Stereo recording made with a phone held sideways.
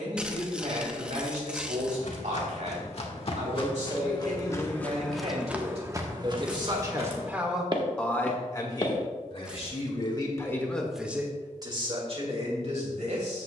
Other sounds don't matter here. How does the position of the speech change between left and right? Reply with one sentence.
In this clip you hear the speech go left and come back.